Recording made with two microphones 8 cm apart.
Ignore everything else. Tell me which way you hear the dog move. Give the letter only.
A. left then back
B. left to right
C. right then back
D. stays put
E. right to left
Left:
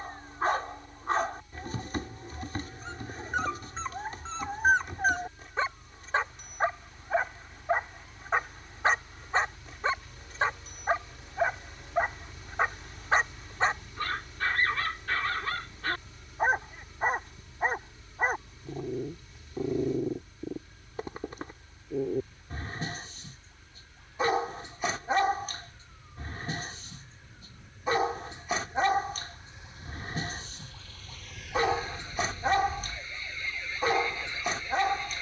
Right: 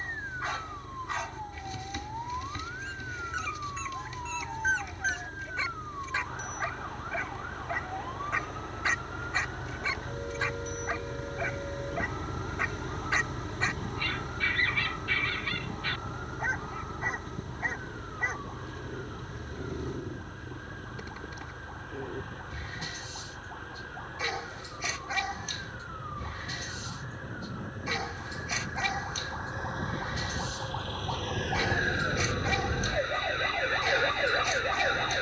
D.